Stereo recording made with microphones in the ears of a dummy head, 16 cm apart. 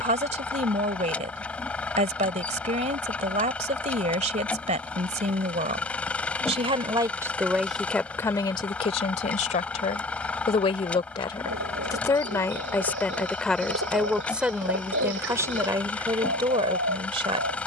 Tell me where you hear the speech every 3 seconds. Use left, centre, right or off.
right, right, centre, left, centre, right.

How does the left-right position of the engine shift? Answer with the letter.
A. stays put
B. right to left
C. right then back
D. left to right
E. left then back
A.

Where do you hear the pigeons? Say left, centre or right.
right.